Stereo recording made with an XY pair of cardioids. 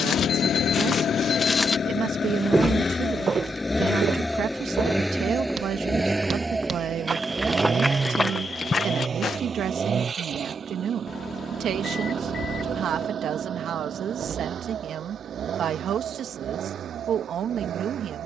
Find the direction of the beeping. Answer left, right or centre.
left.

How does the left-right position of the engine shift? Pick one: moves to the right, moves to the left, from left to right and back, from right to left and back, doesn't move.
moves to the right.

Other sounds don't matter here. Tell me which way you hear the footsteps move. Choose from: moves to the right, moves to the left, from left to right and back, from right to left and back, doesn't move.
from left to right and back.